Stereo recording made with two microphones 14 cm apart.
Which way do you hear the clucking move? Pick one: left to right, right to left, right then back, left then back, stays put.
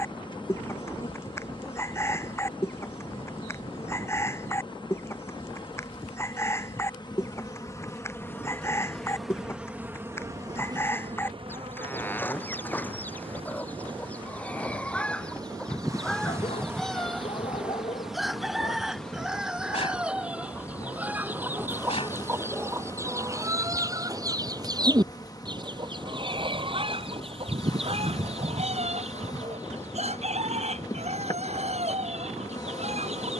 left to right.